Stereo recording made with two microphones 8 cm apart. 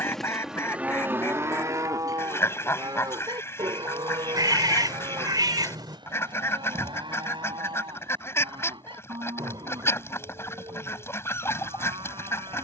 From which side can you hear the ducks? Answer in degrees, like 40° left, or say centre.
30° left.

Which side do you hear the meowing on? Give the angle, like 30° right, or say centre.
50° right.